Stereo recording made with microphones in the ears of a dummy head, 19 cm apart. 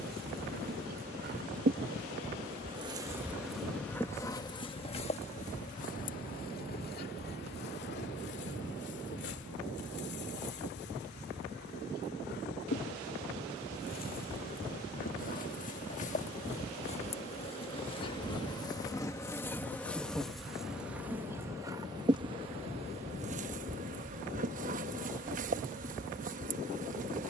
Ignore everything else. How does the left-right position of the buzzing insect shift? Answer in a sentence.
You can hear the buzzing insect go left and come back.